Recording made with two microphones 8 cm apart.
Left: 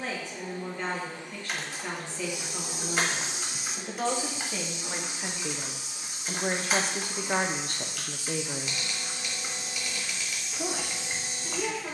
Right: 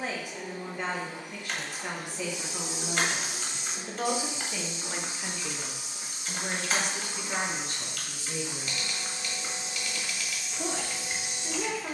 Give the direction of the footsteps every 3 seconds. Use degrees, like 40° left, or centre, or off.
50° left, 20° right, 50° right, centre.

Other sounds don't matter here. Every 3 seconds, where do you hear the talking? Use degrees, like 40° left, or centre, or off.
10° right, 10° left, 50° left, 10° right.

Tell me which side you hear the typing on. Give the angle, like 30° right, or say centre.
centre.